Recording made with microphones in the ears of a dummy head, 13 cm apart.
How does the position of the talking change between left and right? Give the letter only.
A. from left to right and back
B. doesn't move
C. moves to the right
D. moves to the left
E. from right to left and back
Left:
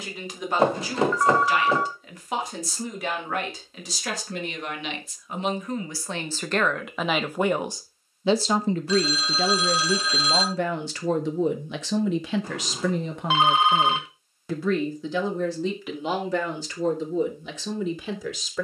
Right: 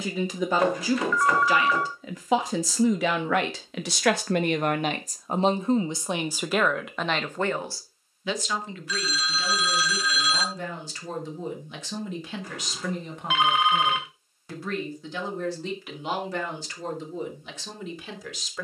D.